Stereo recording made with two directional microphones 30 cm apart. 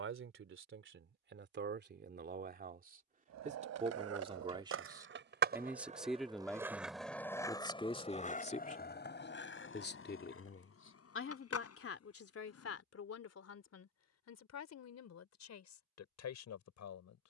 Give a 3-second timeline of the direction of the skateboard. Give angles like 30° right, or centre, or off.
off, 50° right, 10° left, 50° left, 60° left, off.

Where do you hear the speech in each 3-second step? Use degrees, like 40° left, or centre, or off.
40° right, 10° right, 10° left, 40° left, 50° left, 60° left.